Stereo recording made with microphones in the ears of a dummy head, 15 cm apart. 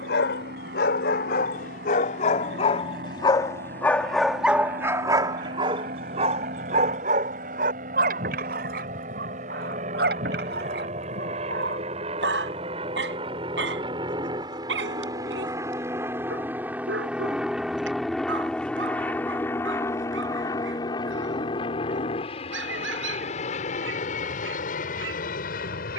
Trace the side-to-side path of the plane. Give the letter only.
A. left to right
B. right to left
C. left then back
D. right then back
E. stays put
B.